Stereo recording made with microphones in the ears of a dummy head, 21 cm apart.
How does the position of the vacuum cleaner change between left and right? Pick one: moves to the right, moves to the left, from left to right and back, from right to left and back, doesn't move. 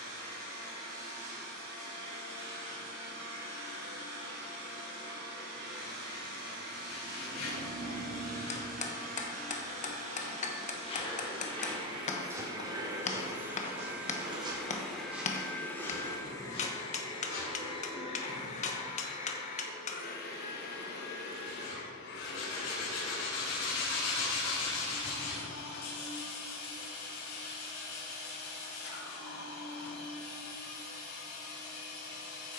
moves to the left.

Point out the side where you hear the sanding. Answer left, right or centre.
left.